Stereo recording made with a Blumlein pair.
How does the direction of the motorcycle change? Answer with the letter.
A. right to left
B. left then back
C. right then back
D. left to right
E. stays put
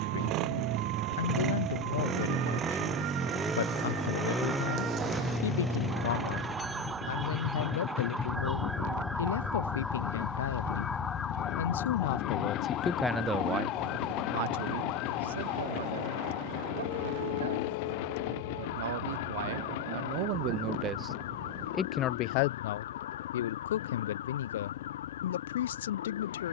A.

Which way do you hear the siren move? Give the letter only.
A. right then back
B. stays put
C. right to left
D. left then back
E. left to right
C.